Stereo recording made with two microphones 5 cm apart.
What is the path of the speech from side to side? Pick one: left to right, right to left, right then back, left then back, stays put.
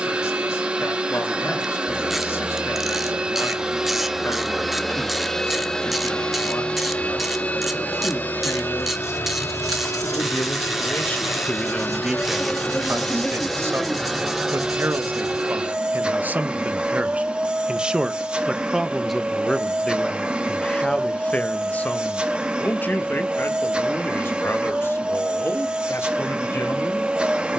right then back.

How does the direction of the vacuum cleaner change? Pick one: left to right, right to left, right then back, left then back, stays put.
left then back.